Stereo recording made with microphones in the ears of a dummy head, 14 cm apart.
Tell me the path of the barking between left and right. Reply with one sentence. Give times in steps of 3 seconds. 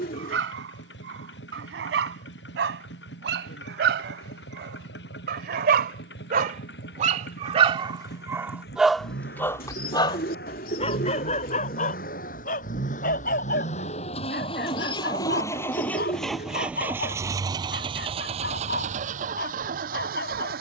In this clip you hear the barking on the right from 0 s and on the left from 9 s.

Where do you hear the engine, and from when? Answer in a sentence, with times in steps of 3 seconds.
In this clip you hear the engine on the left from 0 s, in the centre from 15 s and on the right from 18 s.